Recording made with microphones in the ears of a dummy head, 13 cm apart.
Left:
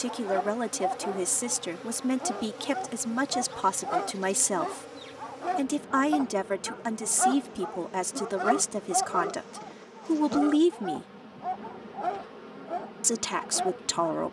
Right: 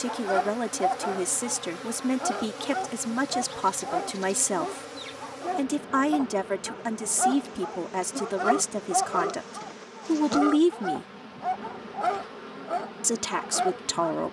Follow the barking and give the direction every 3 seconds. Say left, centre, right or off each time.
right, left, centre, right, right.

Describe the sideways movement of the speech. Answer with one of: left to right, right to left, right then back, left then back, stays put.
stays put.